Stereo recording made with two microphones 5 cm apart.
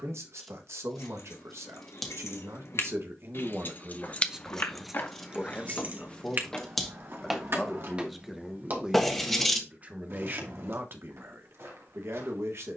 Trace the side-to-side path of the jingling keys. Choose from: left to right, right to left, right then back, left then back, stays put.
left to right.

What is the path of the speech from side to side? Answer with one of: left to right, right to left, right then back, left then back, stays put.
left then back.